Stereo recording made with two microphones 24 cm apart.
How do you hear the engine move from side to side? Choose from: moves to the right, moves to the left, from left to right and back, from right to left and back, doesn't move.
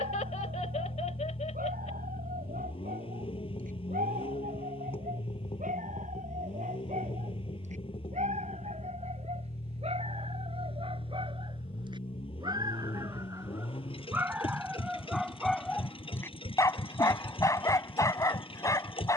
doesn't move.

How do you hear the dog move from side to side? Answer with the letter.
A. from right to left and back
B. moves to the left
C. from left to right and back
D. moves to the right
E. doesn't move
B.